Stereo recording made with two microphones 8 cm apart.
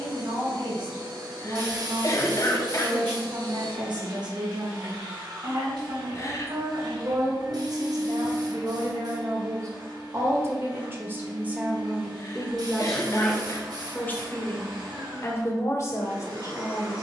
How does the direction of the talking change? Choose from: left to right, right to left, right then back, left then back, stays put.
right to left.